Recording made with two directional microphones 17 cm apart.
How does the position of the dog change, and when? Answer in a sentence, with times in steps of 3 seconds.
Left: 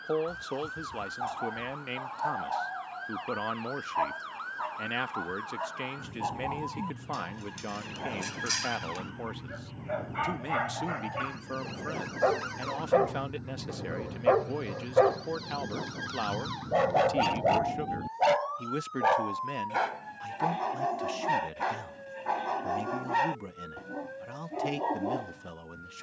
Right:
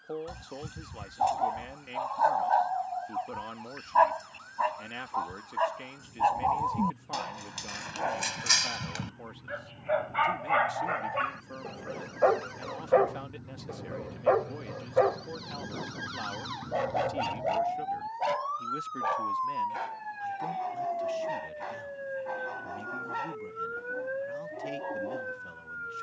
You can hear the dog on the right from 0 s, in the centre from 12 s and on the left from 15 s.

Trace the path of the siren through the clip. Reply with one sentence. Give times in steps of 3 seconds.
You can hear the siren on the left from 0 s, in the centre from 15 s and on the right from 18 s.